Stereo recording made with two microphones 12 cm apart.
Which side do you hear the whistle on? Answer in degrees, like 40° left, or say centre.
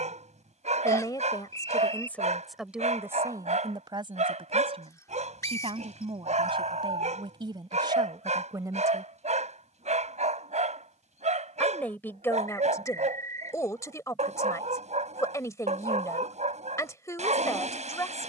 30° left.